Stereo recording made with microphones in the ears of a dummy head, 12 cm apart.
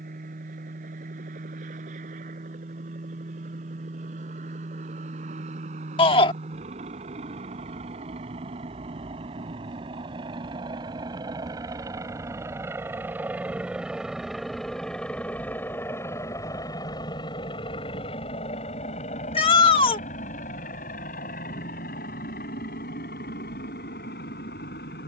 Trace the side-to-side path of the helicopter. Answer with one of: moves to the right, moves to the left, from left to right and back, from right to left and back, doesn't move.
moves to the left.